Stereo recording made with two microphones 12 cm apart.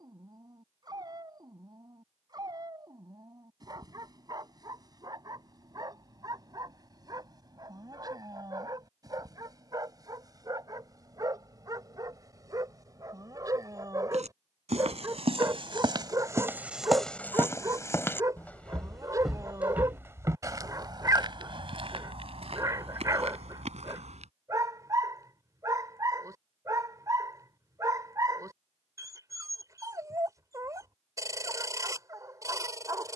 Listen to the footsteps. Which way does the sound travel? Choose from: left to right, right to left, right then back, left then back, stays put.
left then back.